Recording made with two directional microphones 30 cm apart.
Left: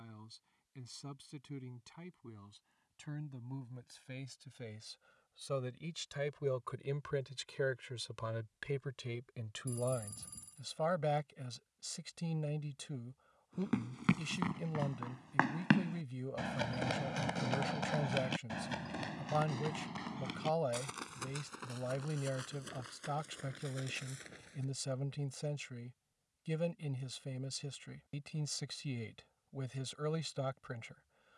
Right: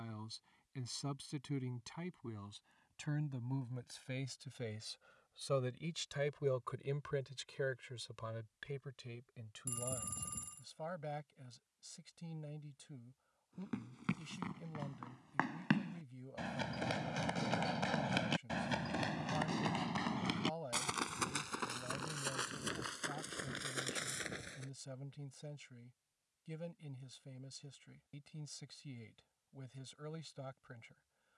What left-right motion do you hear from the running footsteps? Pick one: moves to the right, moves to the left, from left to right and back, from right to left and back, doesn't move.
moves to the right.